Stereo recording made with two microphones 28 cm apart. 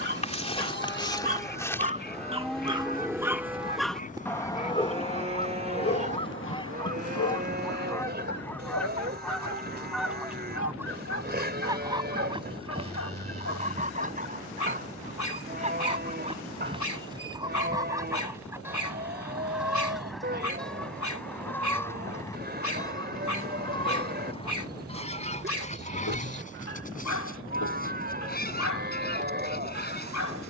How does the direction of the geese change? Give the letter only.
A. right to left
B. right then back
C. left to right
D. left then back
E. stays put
B.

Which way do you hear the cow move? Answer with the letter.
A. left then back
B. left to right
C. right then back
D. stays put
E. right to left
B.